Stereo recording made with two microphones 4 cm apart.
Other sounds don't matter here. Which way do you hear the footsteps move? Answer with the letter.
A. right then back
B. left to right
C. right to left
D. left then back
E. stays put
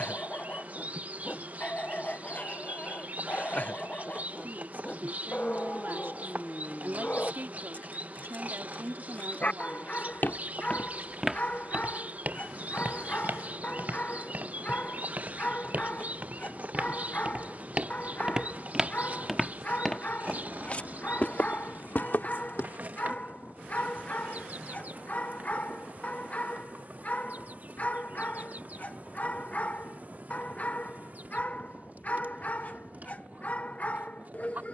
A.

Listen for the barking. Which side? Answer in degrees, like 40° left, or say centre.
40° left.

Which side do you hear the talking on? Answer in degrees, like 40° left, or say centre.
60° right.